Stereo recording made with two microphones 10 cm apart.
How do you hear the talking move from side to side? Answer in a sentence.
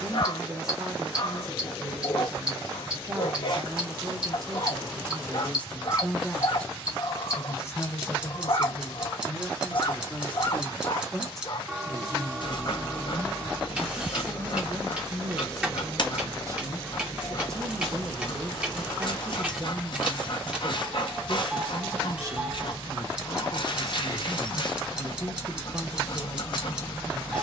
In this clip you hear the talking go left and come back.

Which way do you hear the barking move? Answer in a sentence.
You can hear the barking stay put.